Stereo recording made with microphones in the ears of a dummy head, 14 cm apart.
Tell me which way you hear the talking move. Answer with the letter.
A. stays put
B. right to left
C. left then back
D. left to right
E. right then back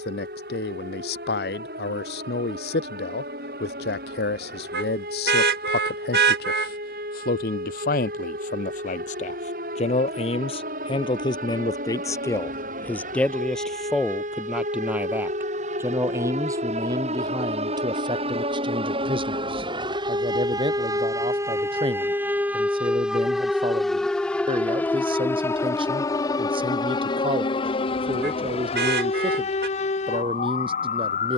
D.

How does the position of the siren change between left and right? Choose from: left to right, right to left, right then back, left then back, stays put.
right to left.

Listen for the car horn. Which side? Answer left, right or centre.
right.